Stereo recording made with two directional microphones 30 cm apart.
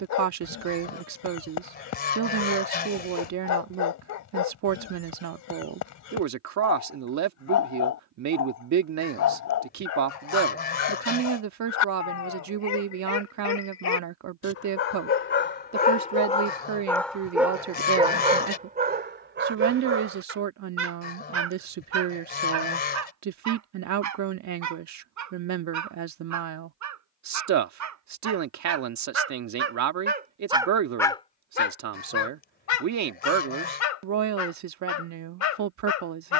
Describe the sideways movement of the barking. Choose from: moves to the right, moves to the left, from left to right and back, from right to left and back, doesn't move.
from left to right and back.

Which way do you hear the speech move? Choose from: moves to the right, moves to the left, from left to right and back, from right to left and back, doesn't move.
doesn't move.